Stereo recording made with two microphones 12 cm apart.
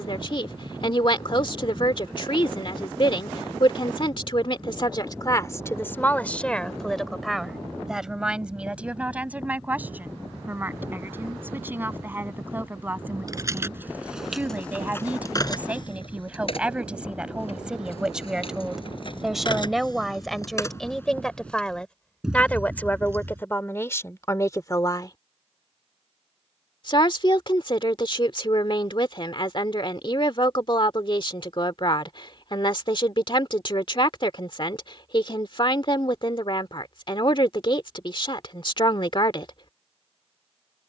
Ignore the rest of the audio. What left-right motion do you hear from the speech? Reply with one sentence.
In this clip you hear the speech go right and come back.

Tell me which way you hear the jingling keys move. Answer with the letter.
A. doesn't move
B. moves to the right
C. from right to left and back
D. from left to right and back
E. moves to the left
C.